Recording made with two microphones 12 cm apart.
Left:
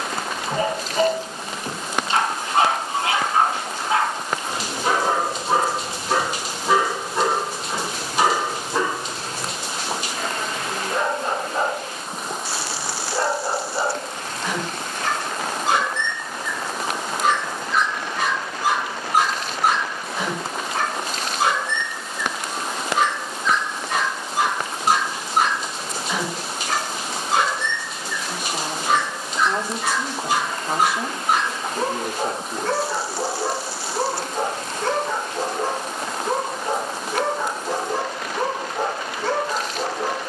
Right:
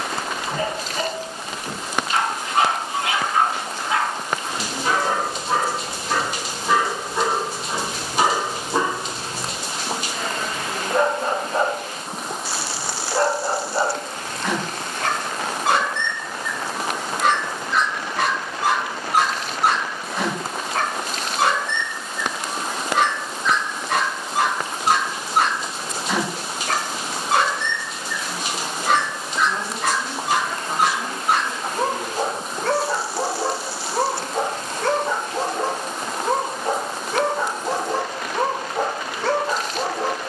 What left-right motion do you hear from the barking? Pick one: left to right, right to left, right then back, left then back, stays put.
left to right.